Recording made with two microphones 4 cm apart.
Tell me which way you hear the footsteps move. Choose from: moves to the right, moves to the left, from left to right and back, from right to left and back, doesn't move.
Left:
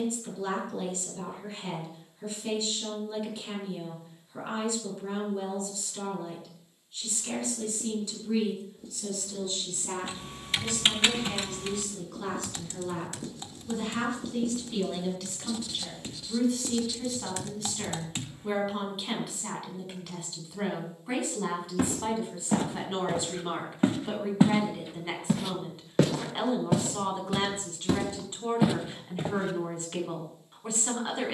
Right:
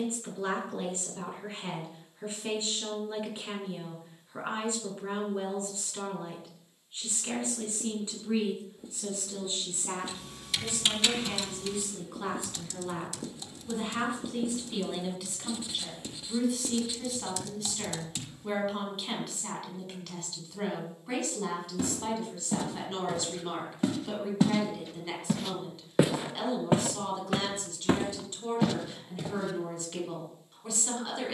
from left to right and back.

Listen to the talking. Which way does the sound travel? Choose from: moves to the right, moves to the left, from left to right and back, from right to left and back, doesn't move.
moves to the left.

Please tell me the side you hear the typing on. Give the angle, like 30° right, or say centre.
40° left.